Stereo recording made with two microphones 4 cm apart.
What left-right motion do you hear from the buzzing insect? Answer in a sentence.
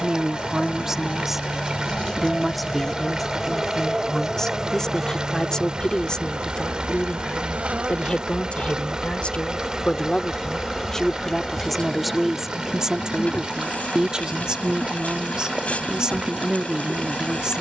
You can hear the buzzing insect move from left to right and back again.